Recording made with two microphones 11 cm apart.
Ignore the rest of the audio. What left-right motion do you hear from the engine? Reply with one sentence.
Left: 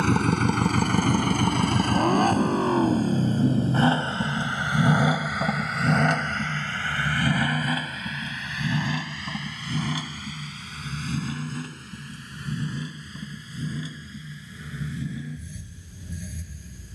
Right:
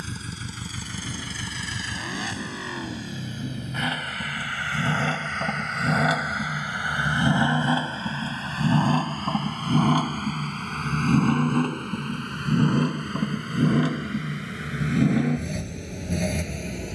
You can hear the engine move to the right.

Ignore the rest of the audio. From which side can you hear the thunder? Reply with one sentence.
In this clip you hear the thunder on the left.